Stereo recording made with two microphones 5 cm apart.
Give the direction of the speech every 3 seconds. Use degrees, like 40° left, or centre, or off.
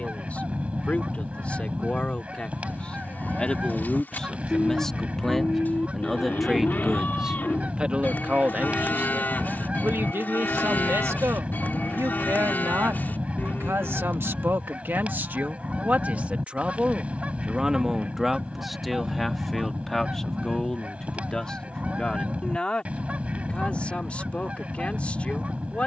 30° left, 10° left, 20° right, 60° right, 60° right, 30° right, centre, 20° left, 30° left.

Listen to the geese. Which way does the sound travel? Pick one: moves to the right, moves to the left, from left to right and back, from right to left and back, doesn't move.
doesn't move.